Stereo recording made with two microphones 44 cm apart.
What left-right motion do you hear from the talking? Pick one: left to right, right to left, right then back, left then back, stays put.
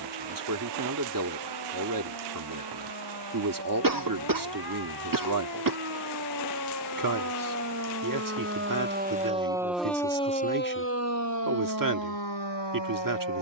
stays put.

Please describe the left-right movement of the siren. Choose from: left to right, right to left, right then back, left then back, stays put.
right to left.